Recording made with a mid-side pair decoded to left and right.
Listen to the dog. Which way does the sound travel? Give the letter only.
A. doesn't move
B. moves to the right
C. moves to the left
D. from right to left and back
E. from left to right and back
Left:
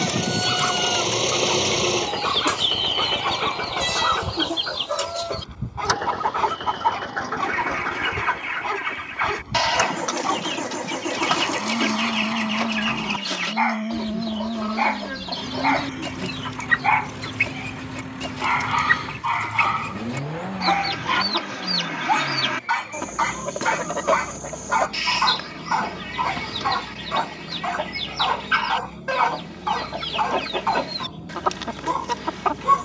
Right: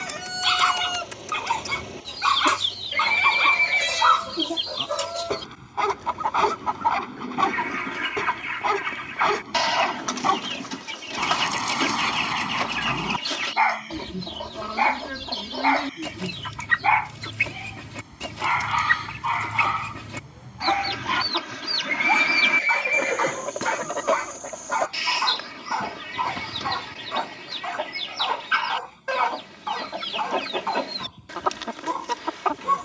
C.